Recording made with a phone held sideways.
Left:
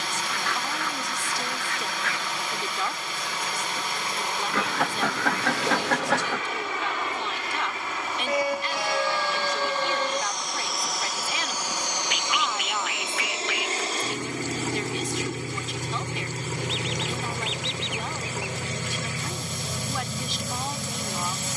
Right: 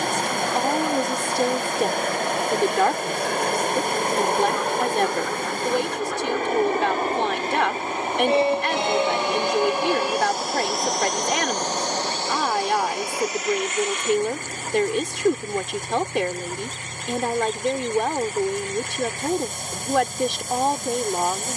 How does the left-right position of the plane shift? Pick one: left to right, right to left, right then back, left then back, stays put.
right to left.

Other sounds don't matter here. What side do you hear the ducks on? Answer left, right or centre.
left.